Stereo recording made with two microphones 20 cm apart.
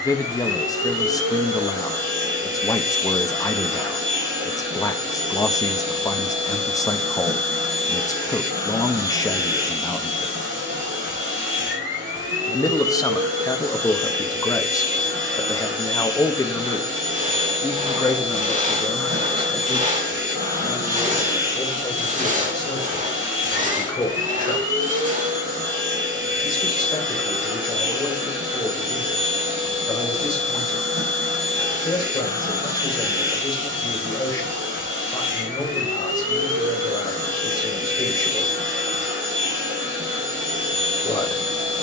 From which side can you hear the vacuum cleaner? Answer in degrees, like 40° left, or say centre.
70° right.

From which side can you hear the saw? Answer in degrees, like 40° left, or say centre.
40° right.